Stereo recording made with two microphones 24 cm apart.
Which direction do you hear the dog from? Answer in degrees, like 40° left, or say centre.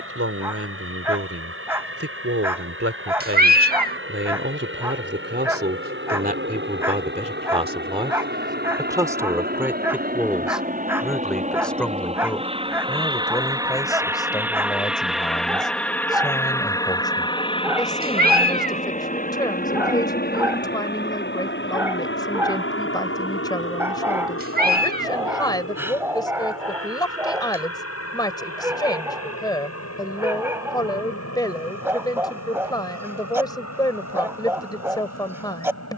10° right.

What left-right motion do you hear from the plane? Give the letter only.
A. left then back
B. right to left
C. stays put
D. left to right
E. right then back
B.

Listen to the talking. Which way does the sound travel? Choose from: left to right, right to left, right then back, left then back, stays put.
right to left.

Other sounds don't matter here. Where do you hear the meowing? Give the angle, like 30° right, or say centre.
40° right.